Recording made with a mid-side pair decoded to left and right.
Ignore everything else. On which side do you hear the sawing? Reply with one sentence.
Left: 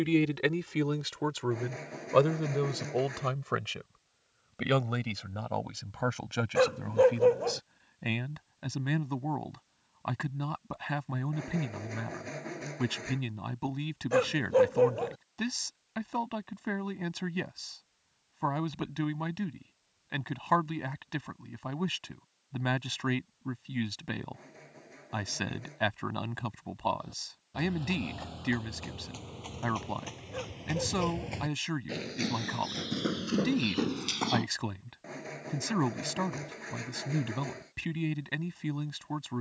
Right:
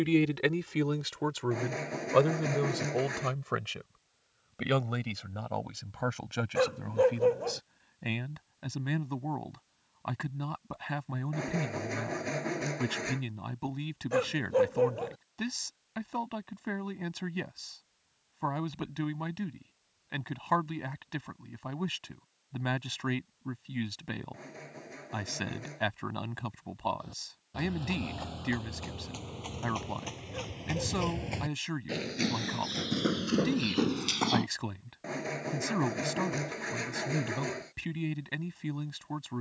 You can hear the sawing on the right.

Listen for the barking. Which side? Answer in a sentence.
In this clip you hear the barking on the left.